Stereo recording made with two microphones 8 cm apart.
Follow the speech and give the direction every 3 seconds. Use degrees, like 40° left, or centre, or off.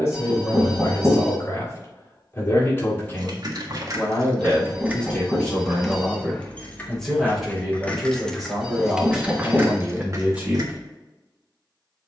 30° left, 20° left, centre, 10° right.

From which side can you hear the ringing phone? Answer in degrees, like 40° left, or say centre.
10° right.